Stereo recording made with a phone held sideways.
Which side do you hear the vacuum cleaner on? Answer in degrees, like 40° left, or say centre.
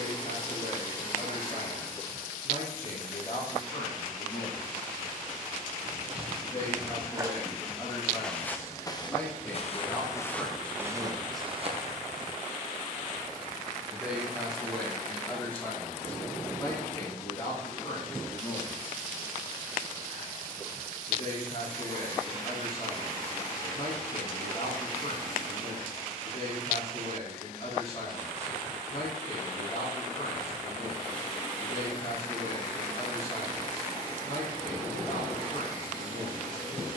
30° left.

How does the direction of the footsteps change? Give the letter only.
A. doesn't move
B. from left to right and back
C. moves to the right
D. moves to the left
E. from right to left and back
E.